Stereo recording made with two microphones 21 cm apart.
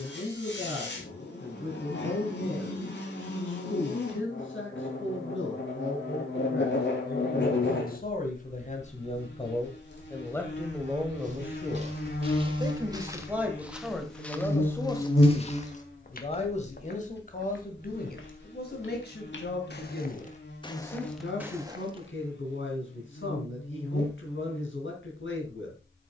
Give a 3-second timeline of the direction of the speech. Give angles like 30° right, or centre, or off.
70° left, 70° left, 50° left, 10° left, centre, 30° left, 50° left, 60° left, 60° left.